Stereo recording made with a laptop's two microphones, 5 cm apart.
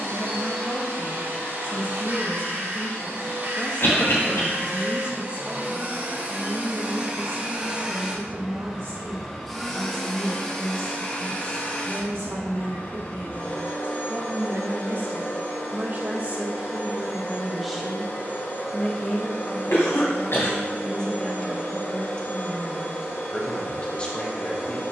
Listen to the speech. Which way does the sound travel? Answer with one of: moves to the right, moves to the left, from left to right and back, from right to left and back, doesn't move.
from left to right and back.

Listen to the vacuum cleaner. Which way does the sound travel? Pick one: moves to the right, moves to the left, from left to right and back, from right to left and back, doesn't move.
moves to the left.